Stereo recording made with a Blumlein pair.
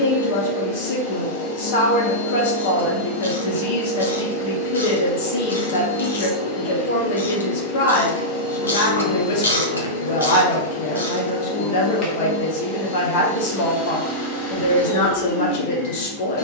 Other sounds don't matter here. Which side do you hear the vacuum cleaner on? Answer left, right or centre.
left.